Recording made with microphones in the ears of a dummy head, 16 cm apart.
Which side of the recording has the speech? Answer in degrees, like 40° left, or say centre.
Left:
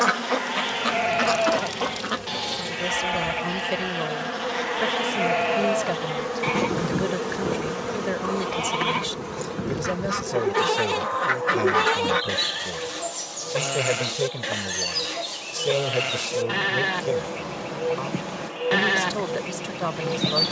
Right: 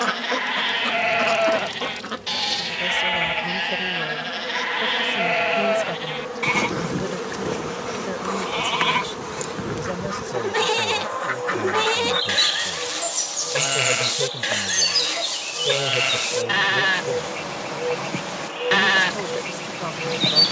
10° left.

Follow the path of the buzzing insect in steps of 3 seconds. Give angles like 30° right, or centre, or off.
40° left, 30° left, 10° right, 40° right, 40° right, 40° right, 40° right.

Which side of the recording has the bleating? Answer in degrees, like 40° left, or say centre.
40° right.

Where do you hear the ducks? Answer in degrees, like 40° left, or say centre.
10° left.